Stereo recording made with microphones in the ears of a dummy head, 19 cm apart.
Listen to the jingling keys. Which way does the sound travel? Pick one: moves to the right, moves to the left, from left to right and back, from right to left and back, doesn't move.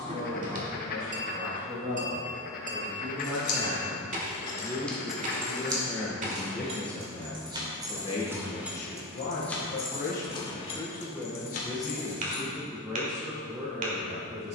from left to right and back.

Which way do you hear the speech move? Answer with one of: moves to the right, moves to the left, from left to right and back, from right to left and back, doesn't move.
from right to left and back.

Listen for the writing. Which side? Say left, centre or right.
left.